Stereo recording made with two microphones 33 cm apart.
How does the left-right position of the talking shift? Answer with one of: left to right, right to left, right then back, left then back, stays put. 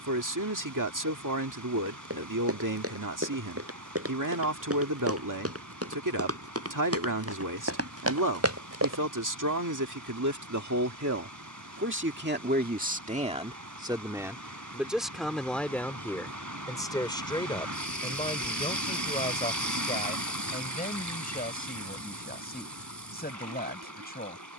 right to left.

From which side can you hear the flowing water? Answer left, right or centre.
right.